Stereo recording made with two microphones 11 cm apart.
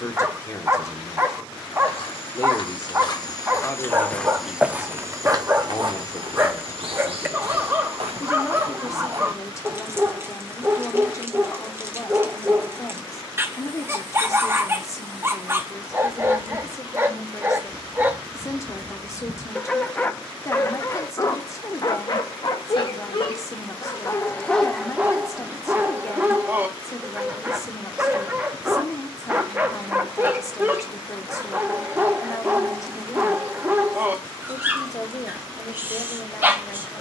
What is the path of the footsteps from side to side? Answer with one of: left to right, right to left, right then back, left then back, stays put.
left to right.